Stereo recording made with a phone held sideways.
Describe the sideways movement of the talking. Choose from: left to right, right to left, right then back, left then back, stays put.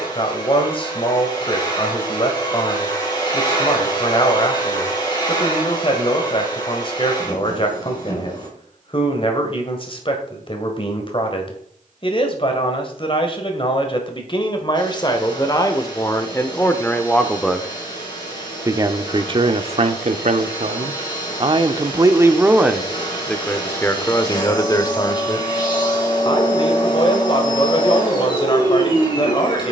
right then back.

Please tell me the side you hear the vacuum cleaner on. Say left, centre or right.
left.